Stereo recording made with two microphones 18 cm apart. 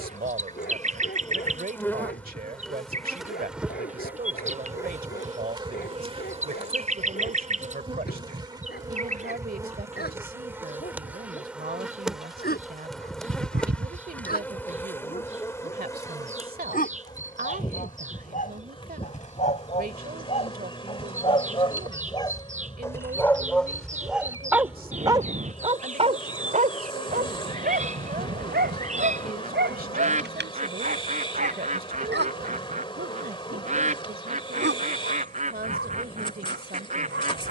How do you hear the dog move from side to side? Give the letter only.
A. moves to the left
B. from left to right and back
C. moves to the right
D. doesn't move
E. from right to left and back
C.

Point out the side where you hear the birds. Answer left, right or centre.
right.